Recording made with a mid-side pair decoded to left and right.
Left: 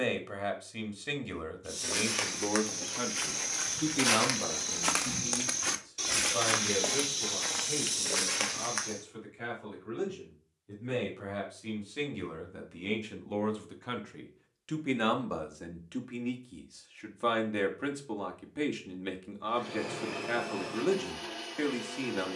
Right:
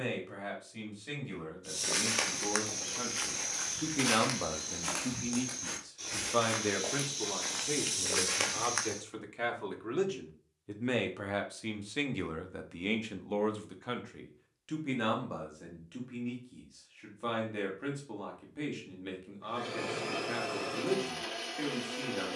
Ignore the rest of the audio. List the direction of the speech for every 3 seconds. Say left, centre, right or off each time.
left, centre, right, right, centre, left, left, left.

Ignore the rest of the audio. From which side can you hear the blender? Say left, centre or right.
right.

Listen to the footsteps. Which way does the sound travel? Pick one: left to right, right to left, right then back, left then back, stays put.
left then back.